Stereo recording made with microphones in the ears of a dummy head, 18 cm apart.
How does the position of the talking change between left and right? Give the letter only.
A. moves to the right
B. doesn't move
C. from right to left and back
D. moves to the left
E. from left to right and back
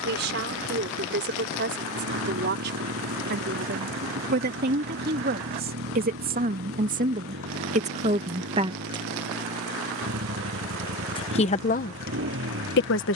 D.